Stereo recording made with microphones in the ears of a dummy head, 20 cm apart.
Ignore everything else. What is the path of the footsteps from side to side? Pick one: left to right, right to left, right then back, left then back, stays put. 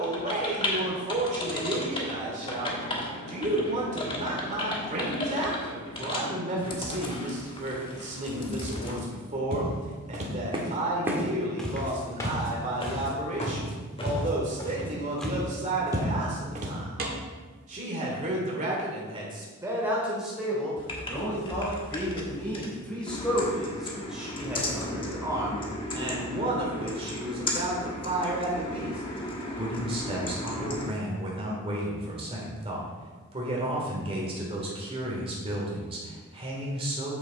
left then back.